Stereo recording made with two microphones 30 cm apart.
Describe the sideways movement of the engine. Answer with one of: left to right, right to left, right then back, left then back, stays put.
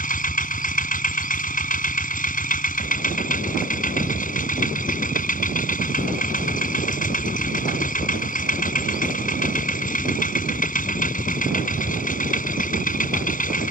stays put.